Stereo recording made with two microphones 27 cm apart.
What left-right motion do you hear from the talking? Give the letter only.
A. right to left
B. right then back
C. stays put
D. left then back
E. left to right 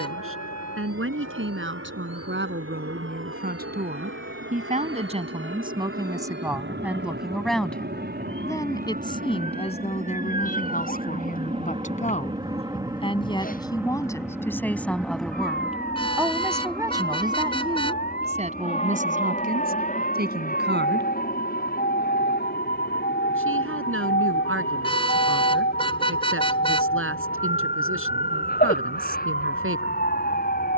D.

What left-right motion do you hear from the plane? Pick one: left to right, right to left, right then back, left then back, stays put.
right to left.